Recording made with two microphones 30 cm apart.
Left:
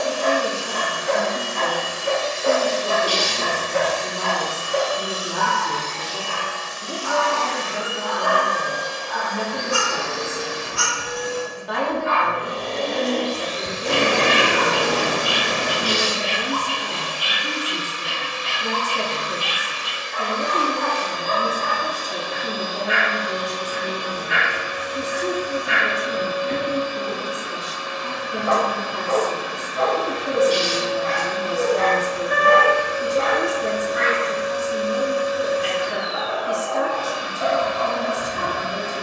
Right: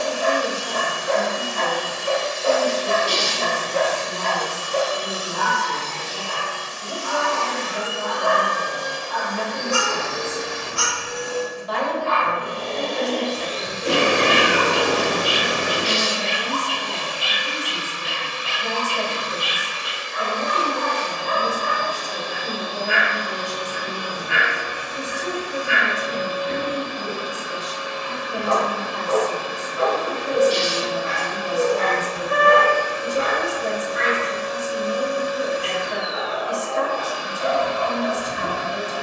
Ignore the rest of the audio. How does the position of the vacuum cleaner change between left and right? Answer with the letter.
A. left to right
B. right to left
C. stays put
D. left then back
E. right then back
C.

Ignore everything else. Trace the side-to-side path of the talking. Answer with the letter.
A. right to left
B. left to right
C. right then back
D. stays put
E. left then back
D.